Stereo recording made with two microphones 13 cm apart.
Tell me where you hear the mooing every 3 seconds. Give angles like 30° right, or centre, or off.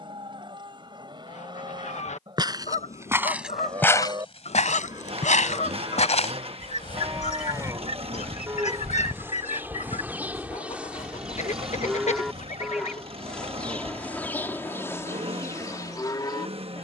40° right, 30° right, 20° right, 10° right, 10° left, 30° left.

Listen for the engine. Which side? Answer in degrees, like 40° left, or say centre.
50° right.